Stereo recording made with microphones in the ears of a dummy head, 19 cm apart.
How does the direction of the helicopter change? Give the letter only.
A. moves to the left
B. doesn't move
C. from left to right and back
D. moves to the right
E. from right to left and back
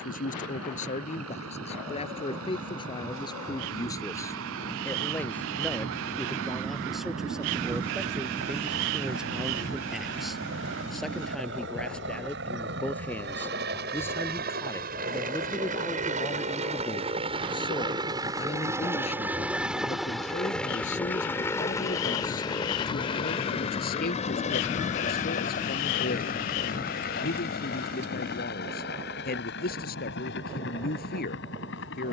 A.